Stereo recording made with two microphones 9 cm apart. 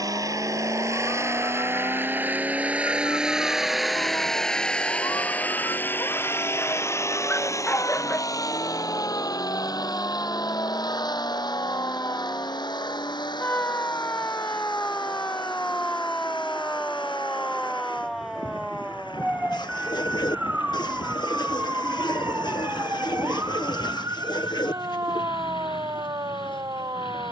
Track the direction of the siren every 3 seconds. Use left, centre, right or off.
left, left, left, left, left, centre, centre, right, right.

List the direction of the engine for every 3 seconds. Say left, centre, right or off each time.
right, centre, left, left, left, left, left, left, left.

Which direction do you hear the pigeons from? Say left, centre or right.
left.